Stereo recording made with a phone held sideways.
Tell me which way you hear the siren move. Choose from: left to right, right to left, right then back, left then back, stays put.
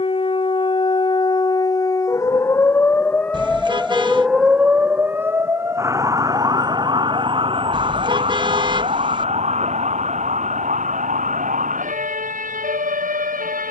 left to right.